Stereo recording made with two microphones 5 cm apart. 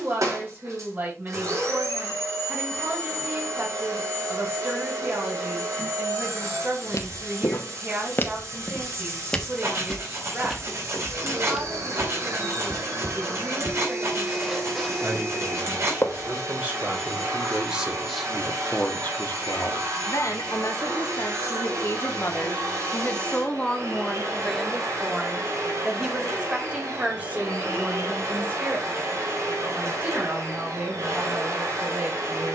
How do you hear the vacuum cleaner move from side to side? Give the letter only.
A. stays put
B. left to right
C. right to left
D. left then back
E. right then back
A.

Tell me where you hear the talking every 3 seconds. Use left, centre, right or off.
right, right, right, right, right, right, left, left, centre, right, right.